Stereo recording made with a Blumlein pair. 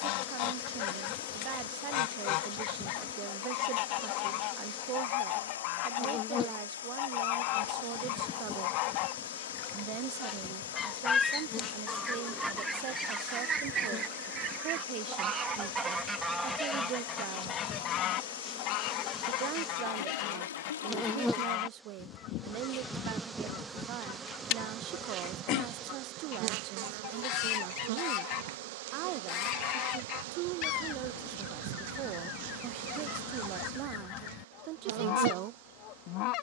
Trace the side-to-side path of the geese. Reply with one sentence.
In this clip you hear the geese go right and come back.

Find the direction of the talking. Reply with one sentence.
In this clip you hear the talking on the right.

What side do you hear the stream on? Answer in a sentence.
In this clip you hear the stream on the left.